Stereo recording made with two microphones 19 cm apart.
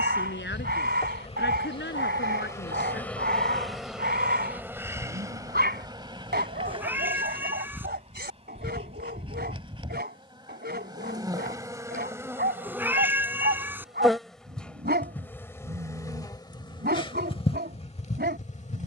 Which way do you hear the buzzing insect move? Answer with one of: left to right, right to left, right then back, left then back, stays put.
right then back.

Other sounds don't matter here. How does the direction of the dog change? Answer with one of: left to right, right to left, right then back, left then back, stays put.
stays put.